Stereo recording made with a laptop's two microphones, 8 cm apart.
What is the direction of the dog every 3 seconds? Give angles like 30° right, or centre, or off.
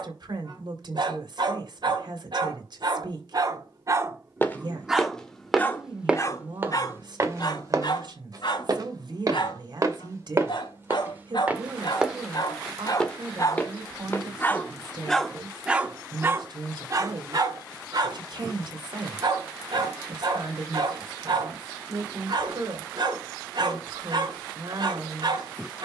60° right, 20° right, 50° left, 70° left, 40° left, 30° right, 60° right, 60° right, 60° right.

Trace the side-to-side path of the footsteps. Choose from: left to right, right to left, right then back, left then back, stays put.
right then back.